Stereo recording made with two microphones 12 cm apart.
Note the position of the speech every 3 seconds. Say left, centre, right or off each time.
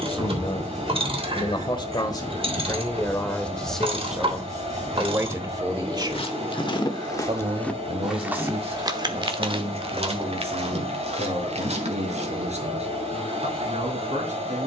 left, centre, right, right, right.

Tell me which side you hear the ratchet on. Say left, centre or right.
right.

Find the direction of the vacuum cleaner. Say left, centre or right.
right.